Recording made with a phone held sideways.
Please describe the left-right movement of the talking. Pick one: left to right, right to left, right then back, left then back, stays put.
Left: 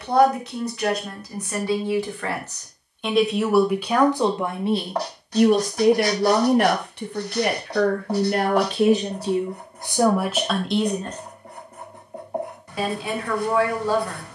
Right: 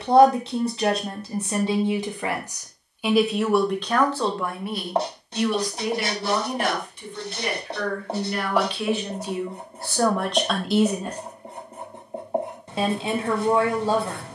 left then back.